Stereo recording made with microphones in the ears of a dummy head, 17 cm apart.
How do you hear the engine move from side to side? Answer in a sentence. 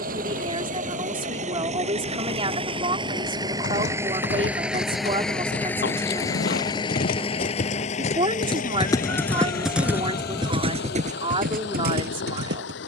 You can hear the engine move from right to left.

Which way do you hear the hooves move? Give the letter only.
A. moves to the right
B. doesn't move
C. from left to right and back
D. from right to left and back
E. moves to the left
A.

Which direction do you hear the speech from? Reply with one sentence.
You can hear the speech on the right.